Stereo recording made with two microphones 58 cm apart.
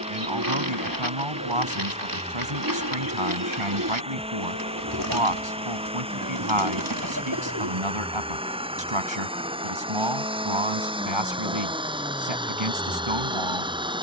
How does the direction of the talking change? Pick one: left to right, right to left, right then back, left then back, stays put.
stays put.